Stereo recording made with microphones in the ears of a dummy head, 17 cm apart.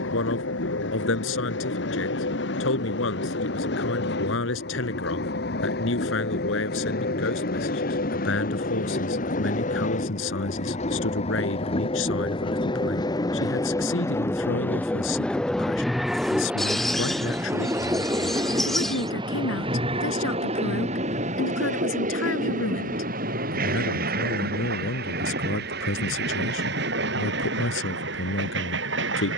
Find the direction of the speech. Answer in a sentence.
In this clip you hear the speech on the left.